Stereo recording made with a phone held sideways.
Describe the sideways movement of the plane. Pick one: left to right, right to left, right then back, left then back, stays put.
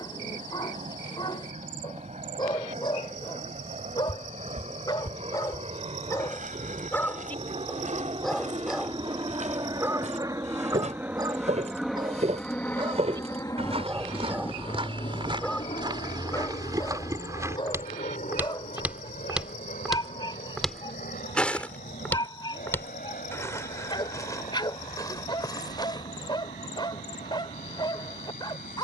right to left.